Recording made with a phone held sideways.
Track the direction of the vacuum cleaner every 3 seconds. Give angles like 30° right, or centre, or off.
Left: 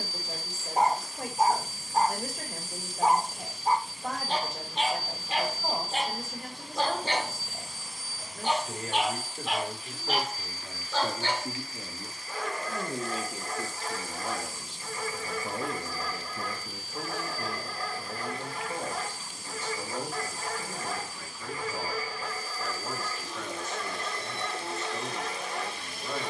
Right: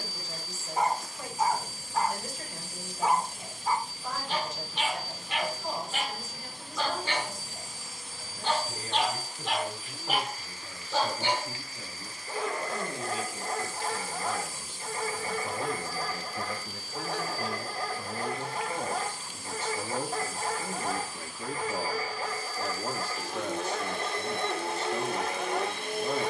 60° right, 20° right, 20° right, 50° right, 60° right, 60° right, 60° right, 60° right, 60° right.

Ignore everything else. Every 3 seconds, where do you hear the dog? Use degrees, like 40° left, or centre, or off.
40° left, 40° left, 30° left, 10° right, 30° right, 30° right, 30° right, 30° right, 30° right.